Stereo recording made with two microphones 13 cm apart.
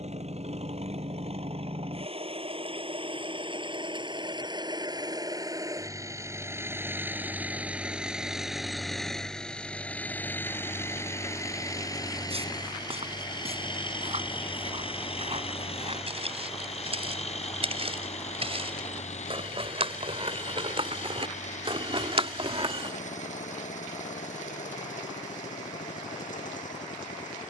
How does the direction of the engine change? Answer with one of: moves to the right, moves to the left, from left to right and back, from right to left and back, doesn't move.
moves to the left.